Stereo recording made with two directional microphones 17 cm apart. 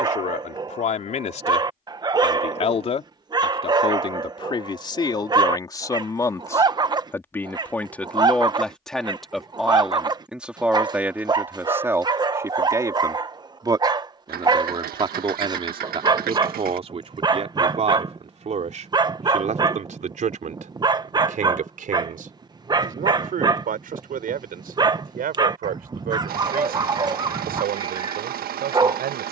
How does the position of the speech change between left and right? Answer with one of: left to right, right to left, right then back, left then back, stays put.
left to right.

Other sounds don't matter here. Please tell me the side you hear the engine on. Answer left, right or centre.
right.